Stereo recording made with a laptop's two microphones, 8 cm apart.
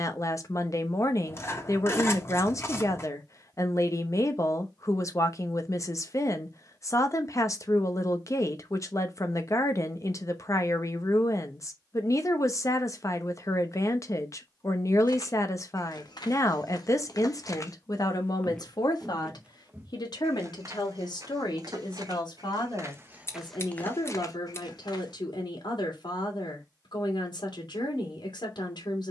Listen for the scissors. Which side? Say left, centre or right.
left.